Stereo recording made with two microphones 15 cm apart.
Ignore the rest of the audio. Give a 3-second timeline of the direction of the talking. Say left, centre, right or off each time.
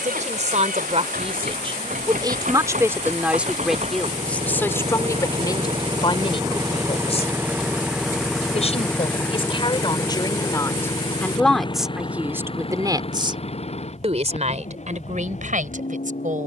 right, centre, left, left, right, right.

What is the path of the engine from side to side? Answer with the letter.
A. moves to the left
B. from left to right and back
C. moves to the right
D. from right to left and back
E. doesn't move
A.